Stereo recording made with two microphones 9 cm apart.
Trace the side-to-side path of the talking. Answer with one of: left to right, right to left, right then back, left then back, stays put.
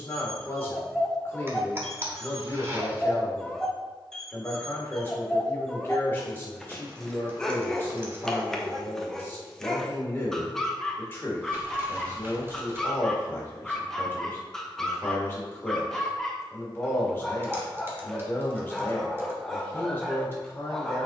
stays put.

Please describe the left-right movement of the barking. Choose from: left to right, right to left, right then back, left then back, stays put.
stays put.